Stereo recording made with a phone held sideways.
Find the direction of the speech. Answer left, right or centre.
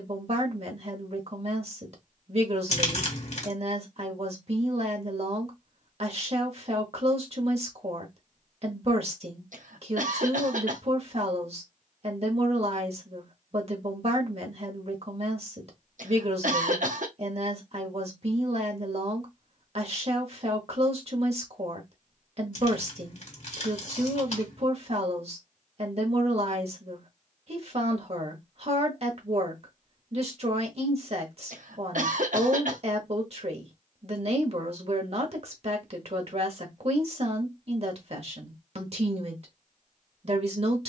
right.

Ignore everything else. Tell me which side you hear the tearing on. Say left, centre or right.
left.